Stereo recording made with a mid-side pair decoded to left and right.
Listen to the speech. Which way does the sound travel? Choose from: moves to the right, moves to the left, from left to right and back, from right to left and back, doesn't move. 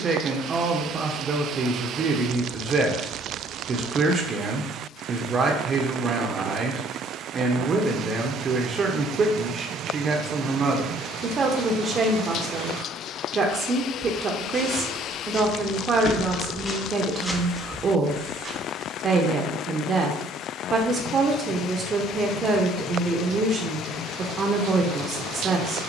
doesn't move.